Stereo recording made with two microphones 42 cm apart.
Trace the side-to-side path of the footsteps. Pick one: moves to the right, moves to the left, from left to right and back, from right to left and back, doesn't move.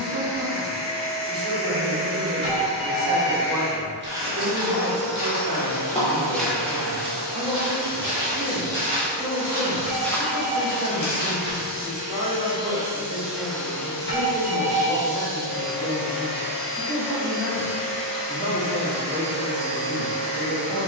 from left to right and back.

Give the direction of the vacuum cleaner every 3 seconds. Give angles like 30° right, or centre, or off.
30° left, 20° right, 60° right, 30° right, centre, 30° left, 30° left.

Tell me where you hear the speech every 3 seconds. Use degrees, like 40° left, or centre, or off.
20° right, 20° right, 20° right, 20° right, 20° right, centre, 30° left.